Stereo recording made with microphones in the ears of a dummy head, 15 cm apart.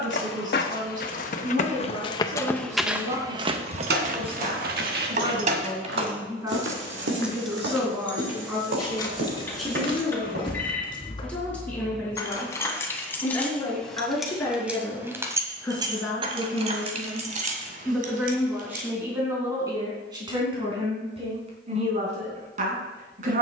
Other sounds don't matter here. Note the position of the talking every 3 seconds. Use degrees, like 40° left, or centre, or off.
50° right, 30° right, 10° right, centre, 10° left, centre, 20° right, 50° right.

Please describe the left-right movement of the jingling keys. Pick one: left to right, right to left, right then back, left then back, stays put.
left then back.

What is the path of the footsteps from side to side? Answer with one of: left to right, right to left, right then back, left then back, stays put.
left to right.